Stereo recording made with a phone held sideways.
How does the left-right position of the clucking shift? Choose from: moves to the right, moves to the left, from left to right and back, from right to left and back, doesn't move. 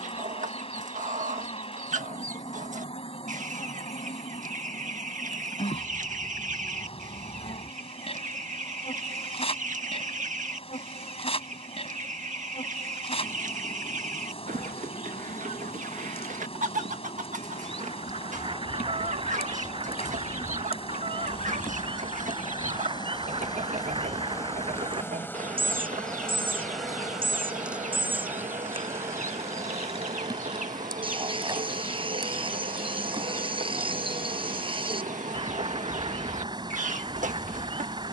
doesn't move.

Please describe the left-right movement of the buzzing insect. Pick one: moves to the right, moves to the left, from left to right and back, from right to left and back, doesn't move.
moves to the right.